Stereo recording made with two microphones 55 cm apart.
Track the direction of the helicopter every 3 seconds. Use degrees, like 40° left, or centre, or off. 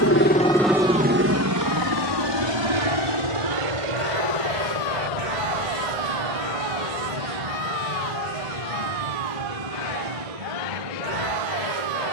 20° right, 60° right, 70° right, 80° right.